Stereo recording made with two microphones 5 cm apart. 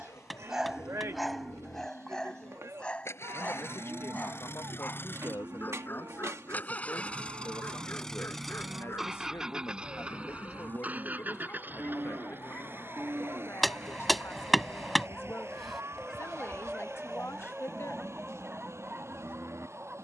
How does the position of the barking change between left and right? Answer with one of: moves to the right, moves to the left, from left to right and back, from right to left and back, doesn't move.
from right to left and back.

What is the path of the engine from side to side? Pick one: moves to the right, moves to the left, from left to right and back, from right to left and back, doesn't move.
moves to the right.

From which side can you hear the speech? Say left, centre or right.
left.